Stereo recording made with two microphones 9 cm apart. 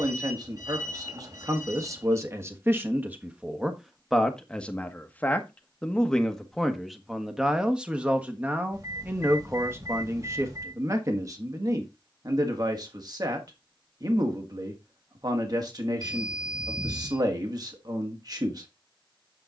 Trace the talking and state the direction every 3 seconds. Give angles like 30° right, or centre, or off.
40° right, centre, 10° right, 30° right, 50° right, 50° right, 50° right.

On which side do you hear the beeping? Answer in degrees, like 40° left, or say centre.
40° right.